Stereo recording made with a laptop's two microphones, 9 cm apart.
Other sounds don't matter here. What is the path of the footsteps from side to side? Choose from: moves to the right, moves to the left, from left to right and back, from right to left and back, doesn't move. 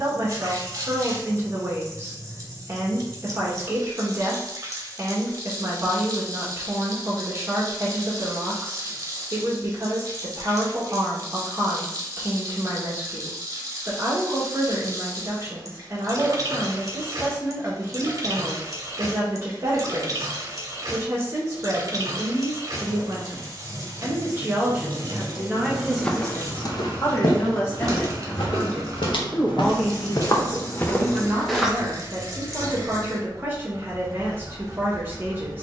from right to left and back.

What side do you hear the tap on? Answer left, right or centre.
right.